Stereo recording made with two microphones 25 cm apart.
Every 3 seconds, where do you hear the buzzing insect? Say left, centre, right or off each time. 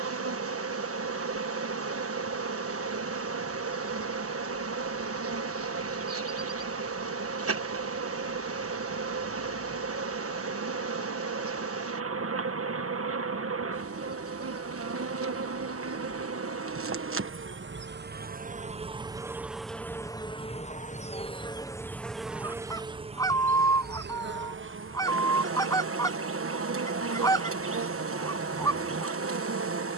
right, right, right, right, right, right, centre, centre, right, right.